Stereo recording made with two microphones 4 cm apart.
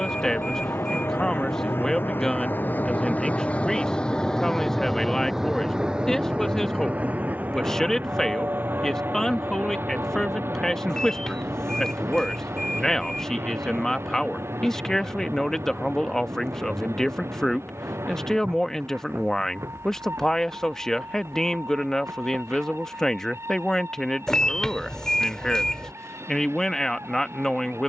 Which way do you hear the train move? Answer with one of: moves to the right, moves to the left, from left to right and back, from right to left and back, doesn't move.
moves to the right.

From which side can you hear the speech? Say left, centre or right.
centre.